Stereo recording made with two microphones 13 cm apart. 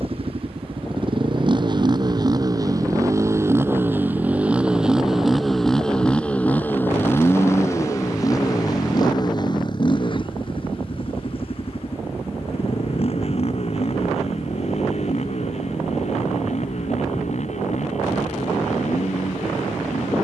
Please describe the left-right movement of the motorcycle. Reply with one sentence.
You can hear the motorcycle move from right to left.